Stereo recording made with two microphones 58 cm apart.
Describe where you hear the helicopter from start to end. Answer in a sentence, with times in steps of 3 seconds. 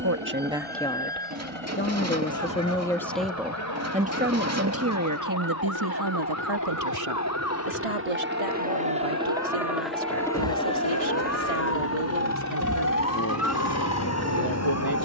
You can hear the helicopter on the right from 0 s, in the centre from 9 s and on the left from 12 s.